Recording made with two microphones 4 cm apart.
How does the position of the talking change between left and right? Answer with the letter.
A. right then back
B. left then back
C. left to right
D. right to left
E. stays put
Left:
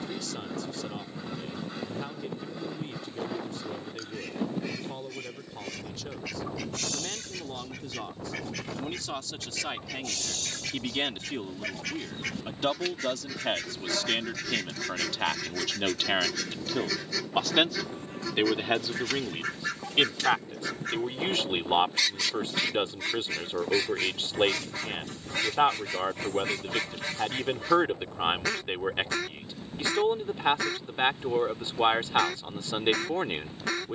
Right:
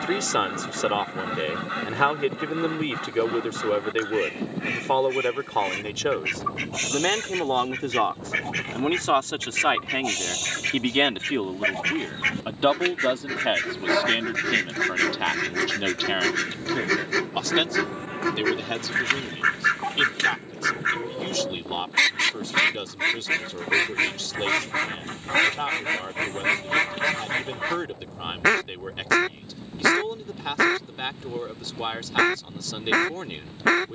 D.